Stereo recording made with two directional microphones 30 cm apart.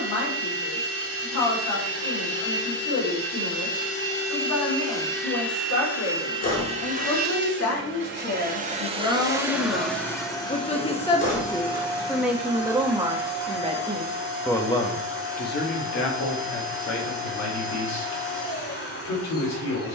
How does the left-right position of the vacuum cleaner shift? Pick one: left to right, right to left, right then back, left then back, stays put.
right then back.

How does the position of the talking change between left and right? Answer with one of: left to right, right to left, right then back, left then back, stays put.
right then back.